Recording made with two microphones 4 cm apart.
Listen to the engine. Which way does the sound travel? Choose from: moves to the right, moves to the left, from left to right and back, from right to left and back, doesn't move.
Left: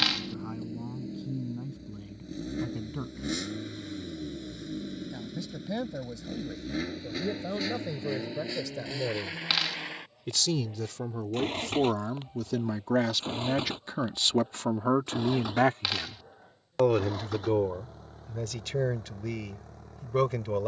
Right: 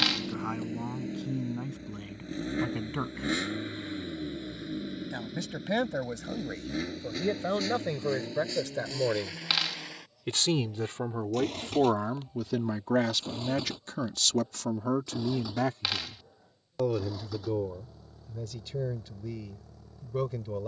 moves to the left.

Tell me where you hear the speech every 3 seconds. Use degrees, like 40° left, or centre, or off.
60° right, 60° right, 50° right, 30° right, 10° left, 60° left, 70° left.